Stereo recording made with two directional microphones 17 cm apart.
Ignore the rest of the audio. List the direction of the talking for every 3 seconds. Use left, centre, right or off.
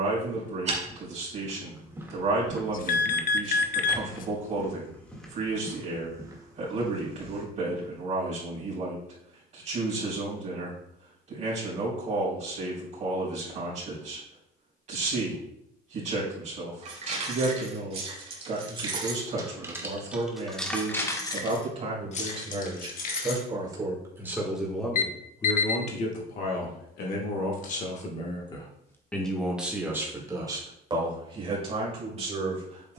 right, right, right, right, right, right, right, right, left, left, right.